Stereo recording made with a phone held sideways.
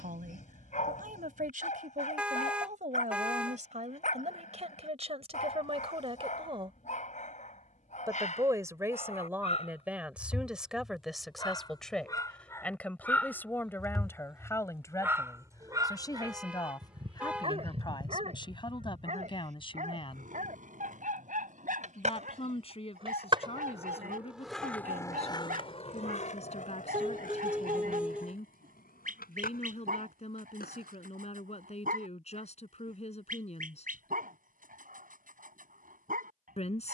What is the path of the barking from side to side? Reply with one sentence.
You can hear the barking move from left to right.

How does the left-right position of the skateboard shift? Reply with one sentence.
In this clip you hear the skateboard go from the right side to the left.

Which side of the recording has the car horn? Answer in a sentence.
In this clip you hear the car horn in the centre.